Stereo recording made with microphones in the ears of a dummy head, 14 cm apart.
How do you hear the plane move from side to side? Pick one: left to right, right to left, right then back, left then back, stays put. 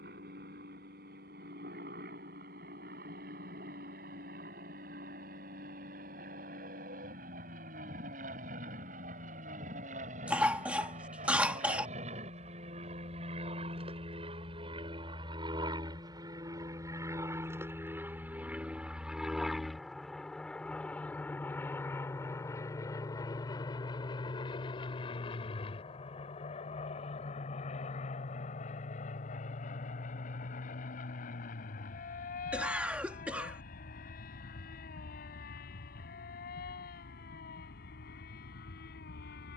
right to left.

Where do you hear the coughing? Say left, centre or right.
centre.